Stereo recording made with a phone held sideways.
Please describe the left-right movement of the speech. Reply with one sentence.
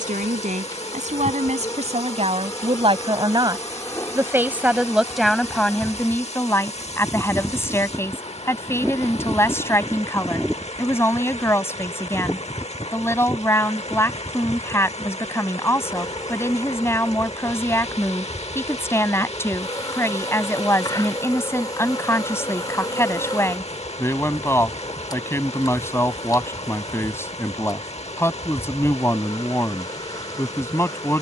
You can hear the speech move from right to left.